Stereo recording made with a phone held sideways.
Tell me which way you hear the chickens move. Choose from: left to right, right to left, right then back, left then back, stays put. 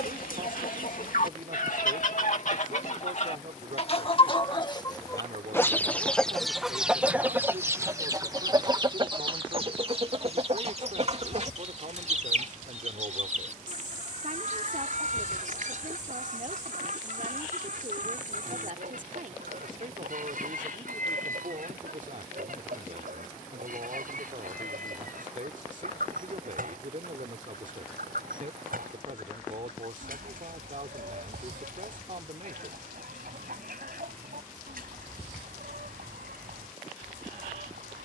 left to right.